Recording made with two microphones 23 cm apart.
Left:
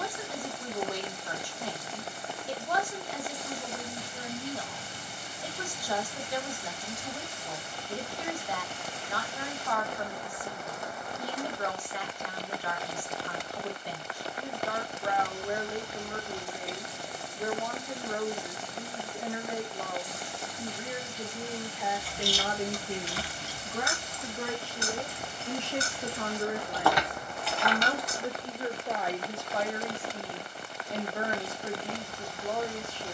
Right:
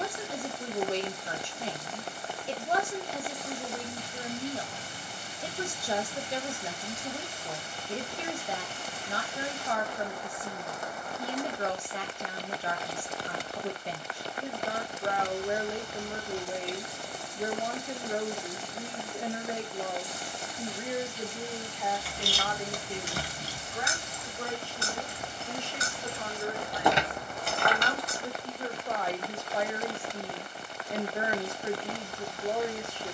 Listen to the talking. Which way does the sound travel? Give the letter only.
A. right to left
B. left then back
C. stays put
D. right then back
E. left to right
B.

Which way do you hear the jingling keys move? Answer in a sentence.
You can hear the jingling keys go left and come back.